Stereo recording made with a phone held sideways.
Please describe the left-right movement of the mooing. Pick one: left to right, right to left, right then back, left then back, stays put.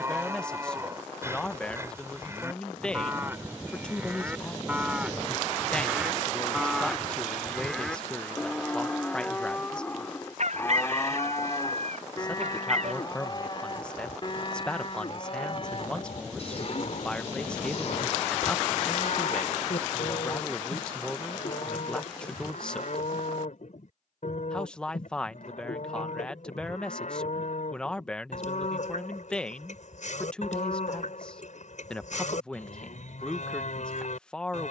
right to left.